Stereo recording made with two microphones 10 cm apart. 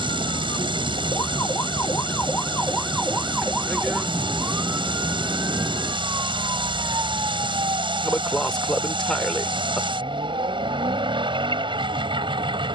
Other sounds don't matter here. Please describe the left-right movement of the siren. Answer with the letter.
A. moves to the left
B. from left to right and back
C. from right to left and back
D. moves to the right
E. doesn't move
D.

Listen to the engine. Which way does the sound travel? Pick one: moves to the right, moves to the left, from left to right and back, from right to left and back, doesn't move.
doesn't move.